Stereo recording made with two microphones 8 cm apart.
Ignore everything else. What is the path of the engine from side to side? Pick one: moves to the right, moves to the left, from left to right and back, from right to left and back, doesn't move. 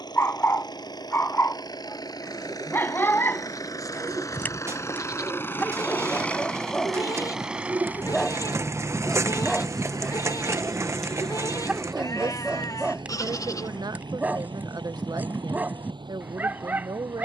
moves to the right.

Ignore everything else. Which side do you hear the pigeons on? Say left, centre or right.
right.